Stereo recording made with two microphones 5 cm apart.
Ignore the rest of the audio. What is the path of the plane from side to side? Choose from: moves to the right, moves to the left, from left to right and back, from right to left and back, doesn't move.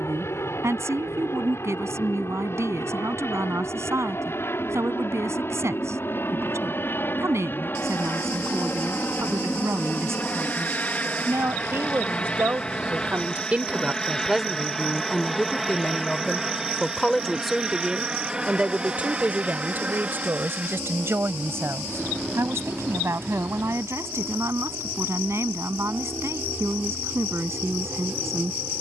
moves to the right.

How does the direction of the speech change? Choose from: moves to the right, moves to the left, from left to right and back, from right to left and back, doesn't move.
from right to left and back.